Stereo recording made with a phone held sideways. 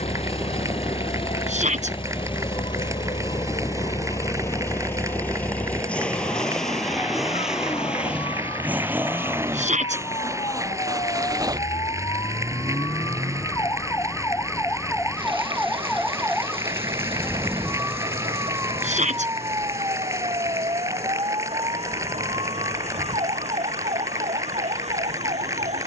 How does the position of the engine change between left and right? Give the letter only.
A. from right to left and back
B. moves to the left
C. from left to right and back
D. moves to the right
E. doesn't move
D.